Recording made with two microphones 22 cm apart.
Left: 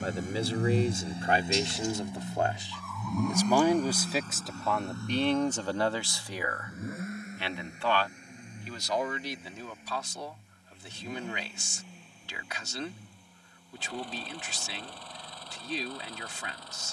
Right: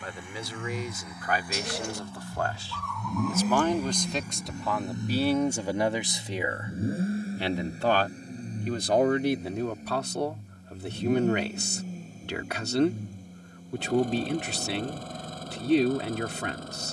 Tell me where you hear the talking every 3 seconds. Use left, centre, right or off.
left, centre, right, right, right, right.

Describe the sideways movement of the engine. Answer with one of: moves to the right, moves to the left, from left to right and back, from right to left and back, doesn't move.
moves to the right.